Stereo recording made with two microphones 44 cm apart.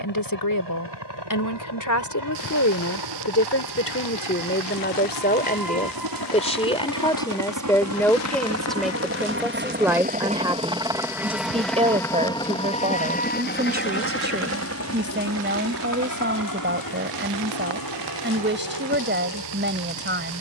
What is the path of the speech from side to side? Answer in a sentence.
In this clip you hear the speech move from left to right.